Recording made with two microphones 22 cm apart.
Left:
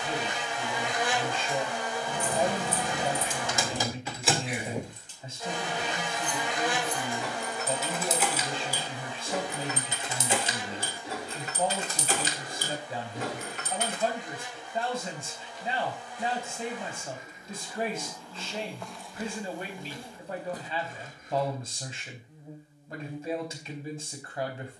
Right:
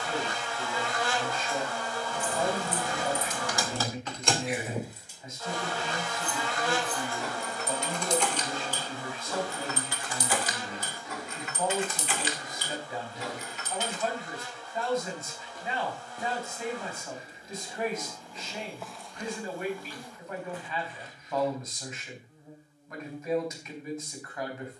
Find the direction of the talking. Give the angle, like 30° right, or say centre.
30° left.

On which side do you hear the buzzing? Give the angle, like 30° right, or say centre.
20° left.